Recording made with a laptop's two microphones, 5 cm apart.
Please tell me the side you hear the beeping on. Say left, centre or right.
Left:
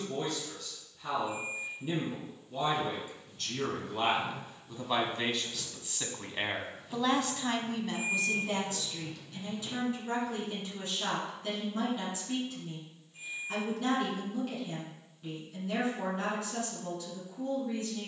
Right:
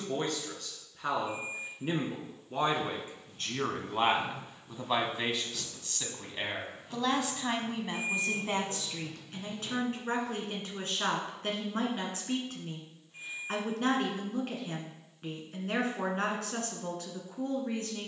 right.